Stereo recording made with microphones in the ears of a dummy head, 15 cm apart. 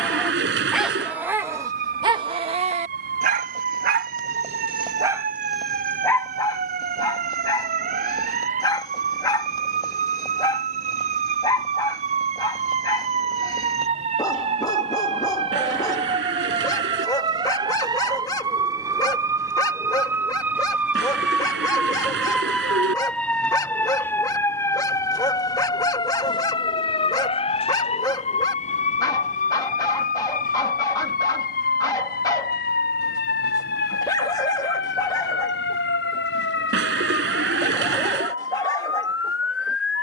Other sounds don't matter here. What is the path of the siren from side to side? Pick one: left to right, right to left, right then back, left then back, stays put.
right to left.